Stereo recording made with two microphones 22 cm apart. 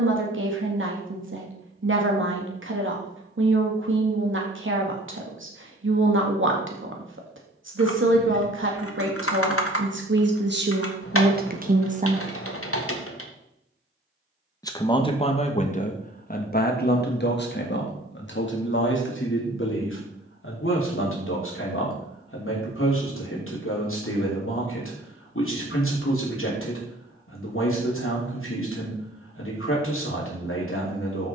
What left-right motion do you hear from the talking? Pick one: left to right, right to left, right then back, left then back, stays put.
right to left.